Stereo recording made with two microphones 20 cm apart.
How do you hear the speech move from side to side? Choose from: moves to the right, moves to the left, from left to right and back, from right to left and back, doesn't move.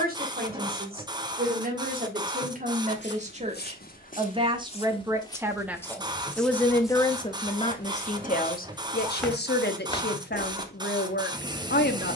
moves to the left.